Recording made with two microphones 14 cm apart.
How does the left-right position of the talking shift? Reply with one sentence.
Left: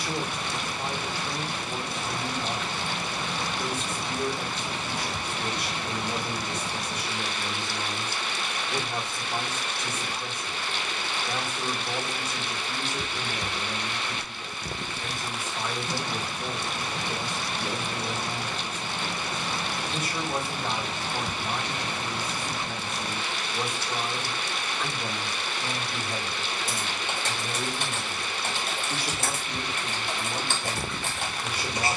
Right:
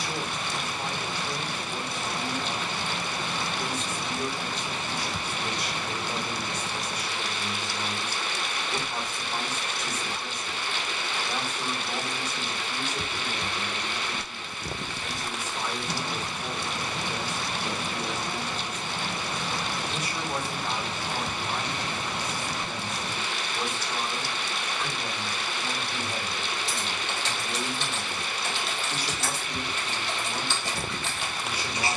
In this clip you hear the talking stay put.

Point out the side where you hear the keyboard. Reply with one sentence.
In this clip you hear the keyboard on the left.